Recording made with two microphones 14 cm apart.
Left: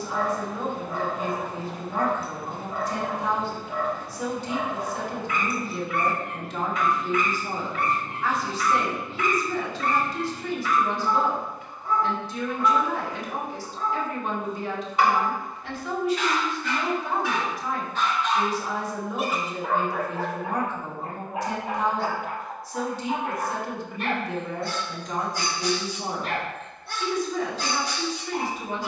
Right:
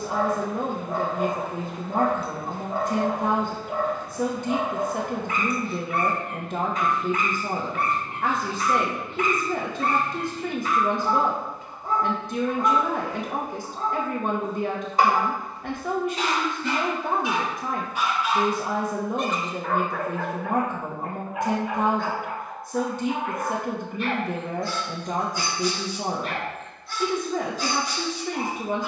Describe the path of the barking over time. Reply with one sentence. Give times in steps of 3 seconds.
You can hear the barking on the right from 0 s, in the centre from 18 s and on the left from 21 s.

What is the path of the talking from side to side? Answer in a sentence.
In this clip you hear the talking stay put.